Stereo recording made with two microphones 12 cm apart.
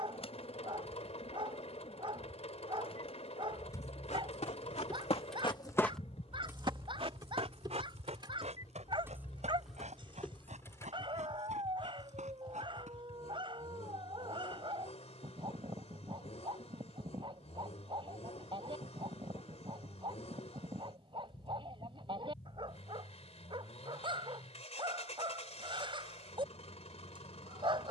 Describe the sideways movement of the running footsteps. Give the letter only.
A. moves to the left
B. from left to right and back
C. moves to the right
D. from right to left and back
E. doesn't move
C.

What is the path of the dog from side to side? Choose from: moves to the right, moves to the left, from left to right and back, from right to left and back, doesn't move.
doesn't move.